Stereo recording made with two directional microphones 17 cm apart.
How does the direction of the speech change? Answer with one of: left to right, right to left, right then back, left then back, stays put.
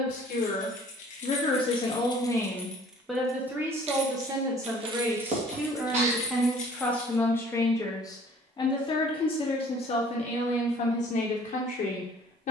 right then back.